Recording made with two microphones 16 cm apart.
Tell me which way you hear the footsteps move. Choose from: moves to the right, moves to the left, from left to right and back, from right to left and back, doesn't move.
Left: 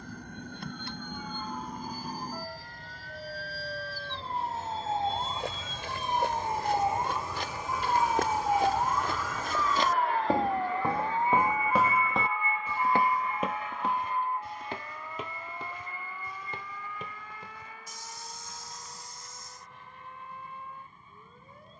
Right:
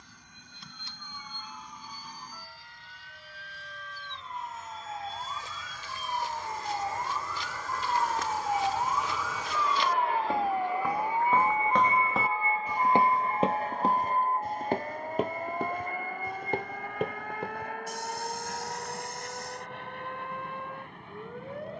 moves to the right.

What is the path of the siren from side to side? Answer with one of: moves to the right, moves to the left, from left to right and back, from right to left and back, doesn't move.
moves to the right.